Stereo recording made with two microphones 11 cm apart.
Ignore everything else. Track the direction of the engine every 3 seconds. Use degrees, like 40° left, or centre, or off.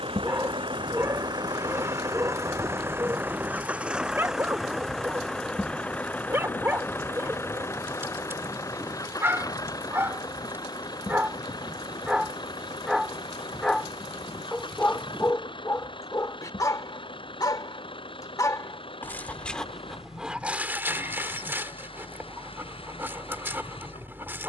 40° right, centre, 20° left, 40° left, 50° left, 50° left, 50° left, 60° left.